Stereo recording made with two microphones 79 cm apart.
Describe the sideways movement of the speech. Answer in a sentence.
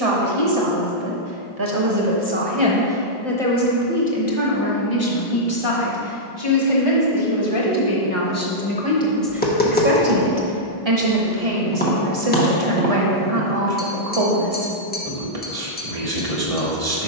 In this clip you hear the speech move from right to left and back again.